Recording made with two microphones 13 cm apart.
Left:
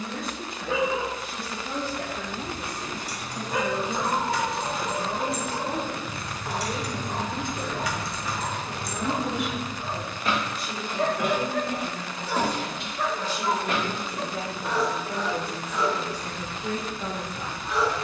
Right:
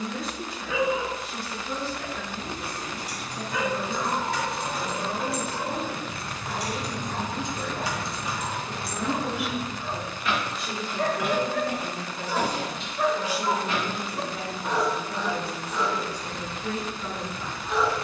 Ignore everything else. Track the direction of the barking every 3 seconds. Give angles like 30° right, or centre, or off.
60° left, 60° left, 40° left, 20° left, 20° right, 30° right.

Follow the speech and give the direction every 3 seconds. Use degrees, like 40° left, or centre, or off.
50° left, 40° left, 20° left, 20° right, centre, 50° left.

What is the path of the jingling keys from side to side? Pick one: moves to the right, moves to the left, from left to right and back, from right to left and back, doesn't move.
moves to the left.